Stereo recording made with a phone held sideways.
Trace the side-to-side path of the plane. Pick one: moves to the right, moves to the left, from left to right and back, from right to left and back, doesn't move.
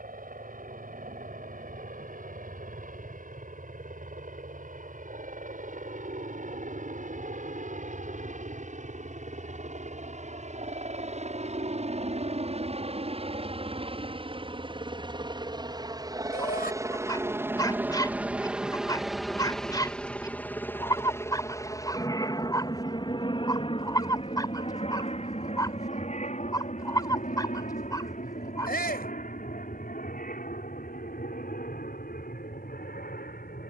moves to the left.